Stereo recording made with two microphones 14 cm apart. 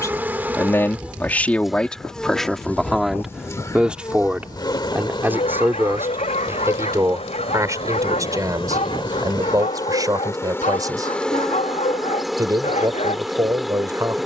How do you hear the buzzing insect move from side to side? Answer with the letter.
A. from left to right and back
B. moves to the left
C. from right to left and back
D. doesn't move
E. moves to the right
C.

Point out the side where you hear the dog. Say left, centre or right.
left.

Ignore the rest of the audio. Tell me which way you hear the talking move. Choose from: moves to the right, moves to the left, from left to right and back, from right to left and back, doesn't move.
moves to the right.